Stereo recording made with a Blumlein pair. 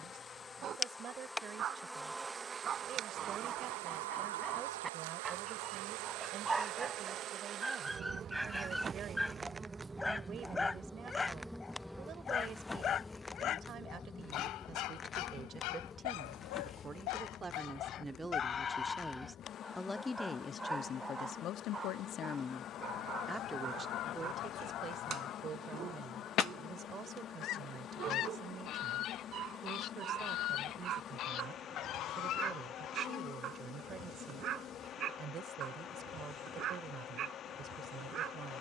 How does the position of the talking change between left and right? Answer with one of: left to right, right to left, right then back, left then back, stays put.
left then back.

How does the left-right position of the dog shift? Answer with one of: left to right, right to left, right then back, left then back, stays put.
left then back.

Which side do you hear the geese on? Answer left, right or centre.
left.